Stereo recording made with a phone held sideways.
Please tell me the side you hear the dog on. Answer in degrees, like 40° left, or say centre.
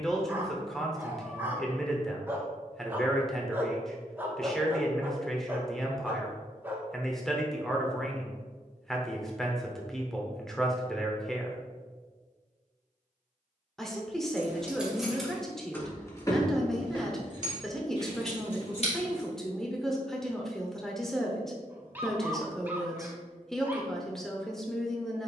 10° right.